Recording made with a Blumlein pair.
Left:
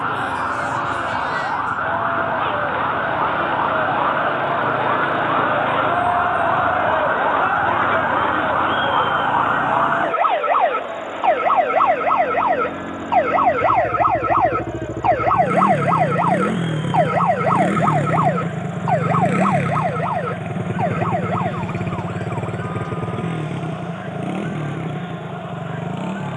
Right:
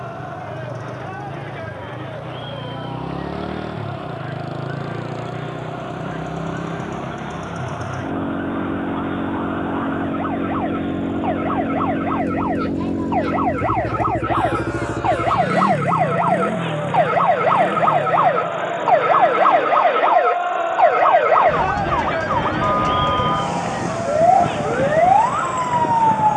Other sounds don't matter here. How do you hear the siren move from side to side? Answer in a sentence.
You can hear the siren travel towards the right.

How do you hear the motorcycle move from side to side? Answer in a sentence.
In this clip you hear the motorcycle move from right to left.